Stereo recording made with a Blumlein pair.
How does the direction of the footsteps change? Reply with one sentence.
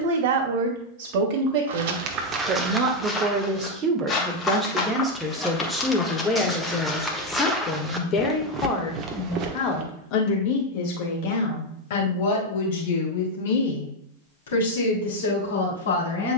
In this clip you hear the footsteps move from right to left and back again.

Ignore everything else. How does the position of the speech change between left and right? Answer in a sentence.
You can hear the speech go from the right side to the left.